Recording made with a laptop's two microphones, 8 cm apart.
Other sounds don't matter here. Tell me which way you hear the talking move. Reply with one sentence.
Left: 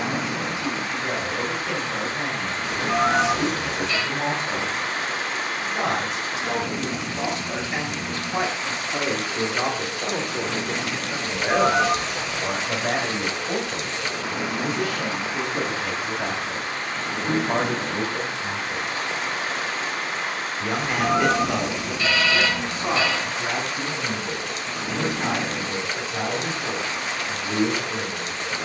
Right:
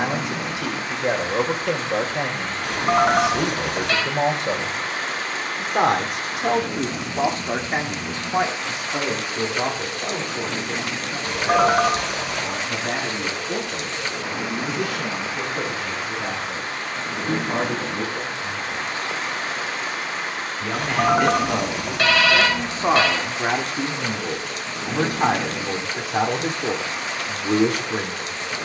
In this clip you hear the talking move from right to left and back again.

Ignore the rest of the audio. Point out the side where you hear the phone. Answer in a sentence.
You can hear the phone on the right.